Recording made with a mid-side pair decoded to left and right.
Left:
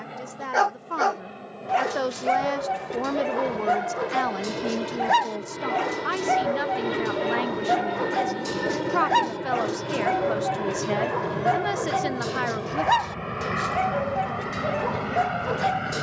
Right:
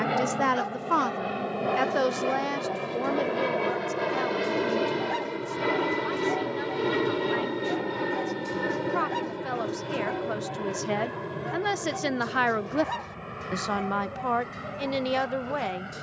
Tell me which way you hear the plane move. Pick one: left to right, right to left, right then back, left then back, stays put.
right to left.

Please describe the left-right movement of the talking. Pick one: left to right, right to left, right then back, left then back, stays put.
left then back.